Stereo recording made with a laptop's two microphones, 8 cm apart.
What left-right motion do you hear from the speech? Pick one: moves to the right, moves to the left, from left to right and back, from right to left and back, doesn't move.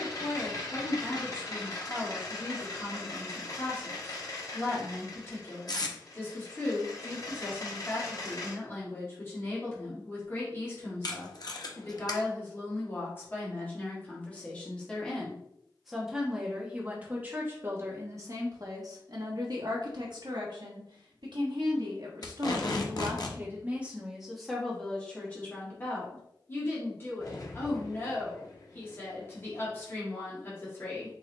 from left to right and back.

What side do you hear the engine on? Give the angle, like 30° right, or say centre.
40° left.